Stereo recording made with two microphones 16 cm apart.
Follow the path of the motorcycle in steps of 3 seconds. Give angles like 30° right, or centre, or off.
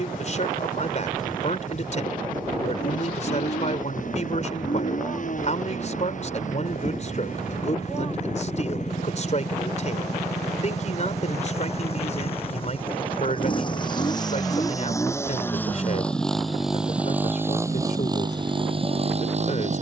60° left, 60° left, 50° left, 50° left, 30° left, centre, 40° right.